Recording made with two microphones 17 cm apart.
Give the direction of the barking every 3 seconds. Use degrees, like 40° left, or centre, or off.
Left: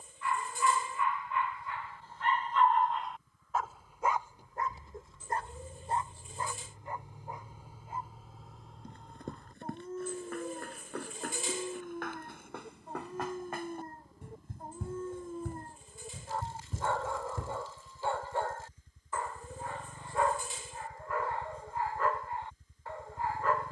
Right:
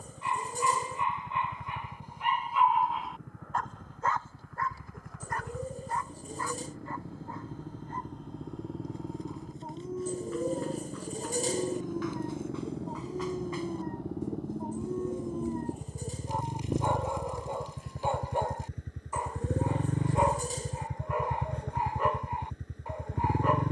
20° right, 20° left, 10° left, 10° right, 20° right, 20° right, 20° right, 20° right.